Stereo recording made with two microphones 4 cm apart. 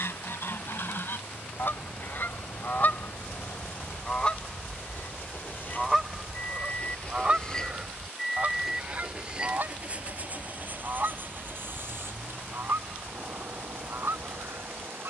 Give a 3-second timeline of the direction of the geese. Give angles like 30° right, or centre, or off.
50° left, 10° left, 30° right, 50° right, 60° right.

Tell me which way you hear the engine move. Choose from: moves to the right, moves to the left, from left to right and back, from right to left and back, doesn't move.
moves to the right.